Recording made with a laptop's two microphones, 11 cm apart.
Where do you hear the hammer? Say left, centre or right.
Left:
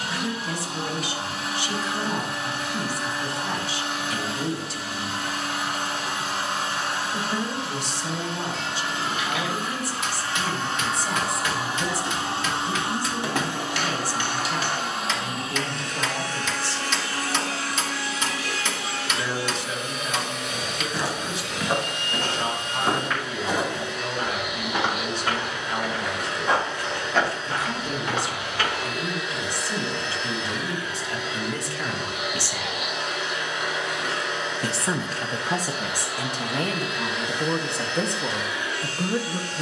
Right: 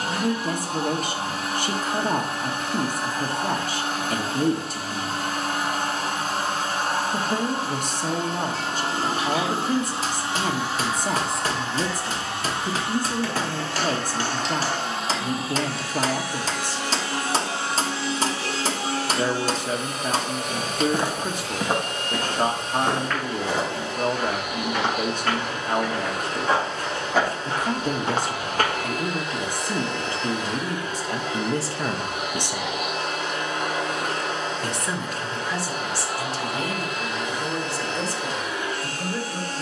right.